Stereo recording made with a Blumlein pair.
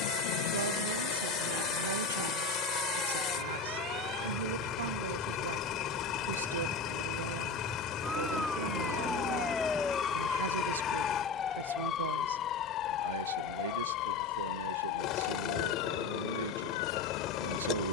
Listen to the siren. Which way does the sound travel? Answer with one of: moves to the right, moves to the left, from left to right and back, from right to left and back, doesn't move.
moves to the left.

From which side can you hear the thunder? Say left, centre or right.
left.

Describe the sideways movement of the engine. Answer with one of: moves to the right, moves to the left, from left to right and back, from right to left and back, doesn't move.
doesn't move.